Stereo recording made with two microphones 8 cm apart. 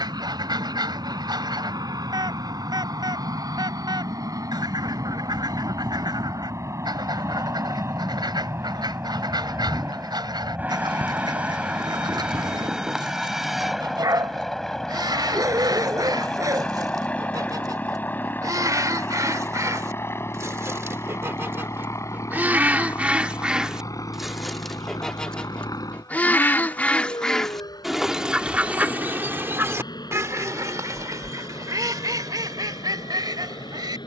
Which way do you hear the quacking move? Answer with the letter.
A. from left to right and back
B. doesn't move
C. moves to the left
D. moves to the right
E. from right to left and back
E.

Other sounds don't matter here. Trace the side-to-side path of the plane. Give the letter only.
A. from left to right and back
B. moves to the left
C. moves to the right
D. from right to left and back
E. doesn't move
B.